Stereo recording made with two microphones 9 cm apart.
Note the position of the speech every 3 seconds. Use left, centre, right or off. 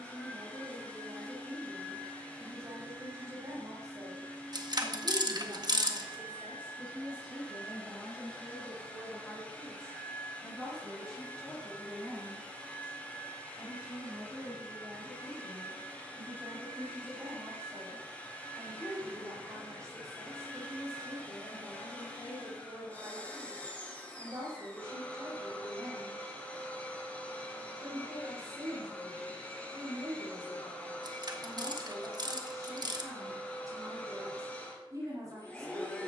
right, right, centre, centre, centre, right, right, right, right, right, right, right.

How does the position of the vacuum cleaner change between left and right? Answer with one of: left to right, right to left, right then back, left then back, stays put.
stays put.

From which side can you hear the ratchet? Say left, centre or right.
right.